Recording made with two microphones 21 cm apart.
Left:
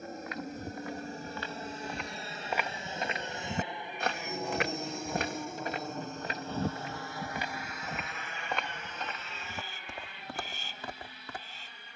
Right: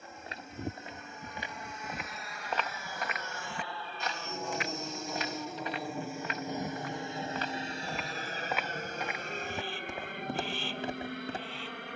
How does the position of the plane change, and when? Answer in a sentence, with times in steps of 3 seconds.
In this clip you hear the plane on the left from 0 s, in the centre from 3 s and on the right from 6 s.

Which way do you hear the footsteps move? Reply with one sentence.
In this clip you hear the footsteps go left and come back.